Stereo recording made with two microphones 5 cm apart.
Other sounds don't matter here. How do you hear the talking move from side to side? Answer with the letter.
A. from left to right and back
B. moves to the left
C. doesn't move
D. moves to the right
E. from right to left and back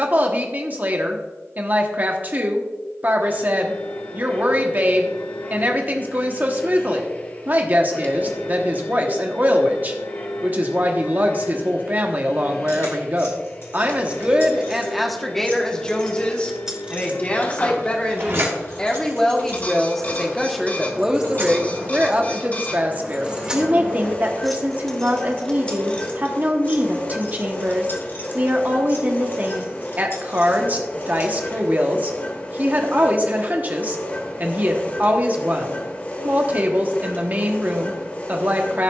E.